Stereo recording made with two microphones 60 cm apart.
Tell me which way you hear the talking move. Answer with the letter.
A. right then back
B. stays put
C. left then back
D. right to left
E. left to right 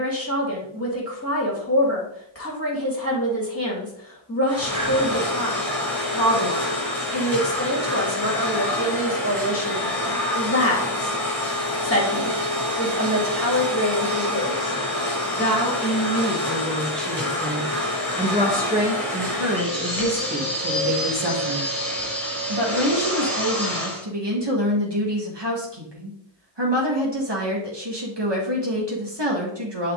E.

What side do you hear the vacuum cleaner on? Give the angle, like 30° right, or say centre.
centre.